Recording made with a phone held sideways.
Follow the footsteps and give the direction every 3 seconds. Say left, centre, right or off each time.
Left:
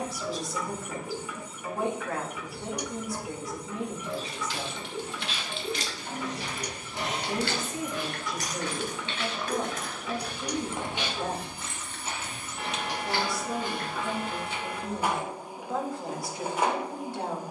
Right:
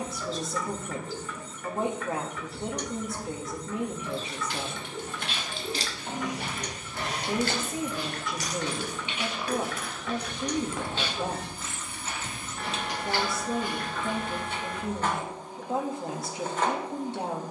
off, right, right, centre, left, off.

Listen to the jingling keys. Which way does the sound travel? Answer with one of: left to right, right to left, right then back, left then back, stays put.
left then back.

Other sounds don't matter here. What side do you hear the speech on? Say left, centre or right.
right.